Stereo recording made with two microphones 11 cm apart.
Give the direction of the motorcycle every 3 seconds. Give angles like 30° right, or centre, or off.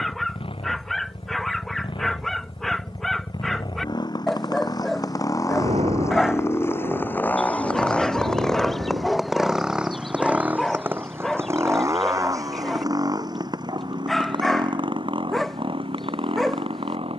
50° left, 40° left, 10° left, 10° right, 40° right, 50° right.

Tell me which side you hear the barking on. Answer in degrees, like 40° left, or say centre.
centre.